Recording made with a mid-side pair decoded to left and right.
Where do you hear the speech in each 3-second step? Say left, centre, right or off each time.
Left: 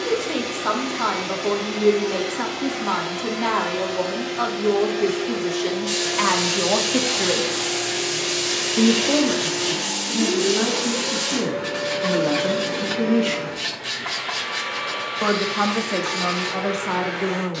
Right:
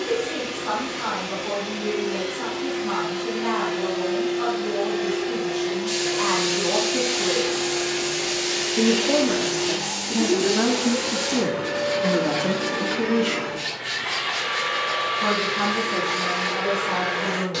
left, left, left, centre, centre, left.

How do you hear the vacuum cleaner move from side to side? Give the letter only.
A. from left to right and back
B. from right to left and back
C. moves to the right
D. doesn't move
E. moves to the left
C.